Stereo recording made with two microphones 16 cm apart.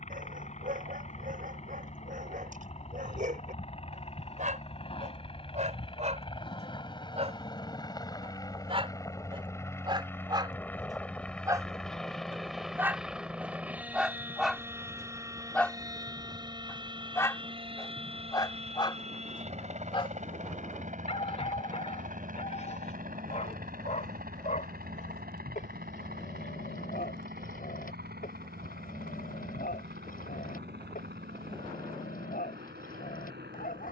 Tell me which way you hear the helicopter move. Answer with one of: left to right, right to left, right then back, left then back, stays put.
left to right.